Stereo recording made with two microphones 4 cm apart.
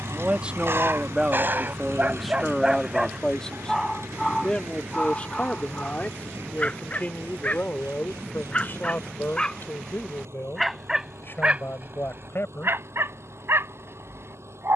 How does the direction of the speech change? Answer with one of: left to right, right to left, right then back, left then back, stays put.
right to left.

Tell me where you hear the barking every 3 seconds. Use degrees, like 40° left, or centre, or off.
40° right, 10° left, 30° left, 10° right, 60° right.